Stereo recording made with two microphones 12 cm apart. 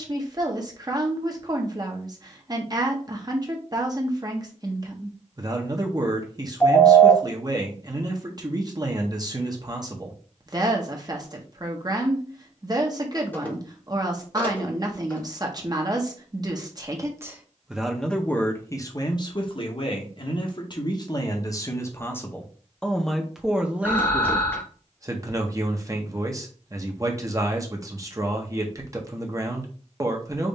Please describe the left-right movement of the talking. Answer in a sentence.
In this clip you hear the talking go left and come back.